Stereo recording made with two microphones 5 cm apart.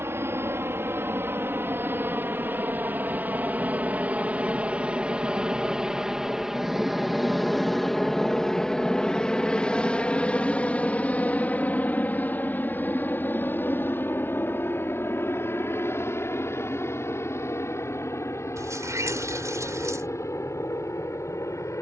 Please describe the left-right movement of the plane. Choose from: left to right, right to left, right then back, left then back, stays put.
right to left.